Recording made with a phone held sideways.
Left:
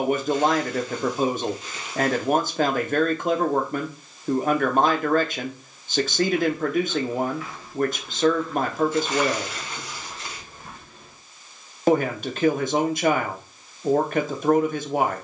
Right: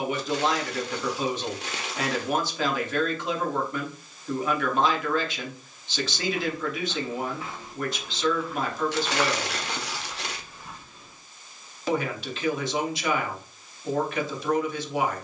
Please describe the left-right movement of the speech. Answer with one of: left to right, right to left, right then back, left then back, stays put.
stays put.